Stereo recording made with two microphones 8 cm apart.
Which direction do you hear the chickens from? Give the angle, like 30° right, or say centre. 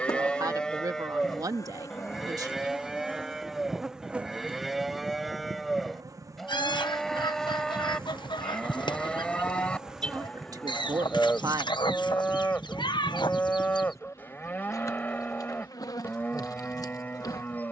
70° left.